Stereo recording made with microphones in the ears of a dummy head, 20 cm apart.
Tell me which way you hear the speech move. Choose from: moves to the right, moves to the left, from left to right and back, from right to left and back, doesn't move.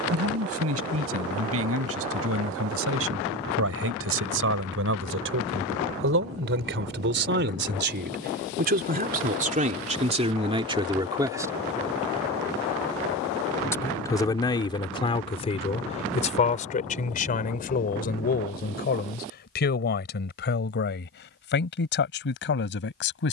moves to the left.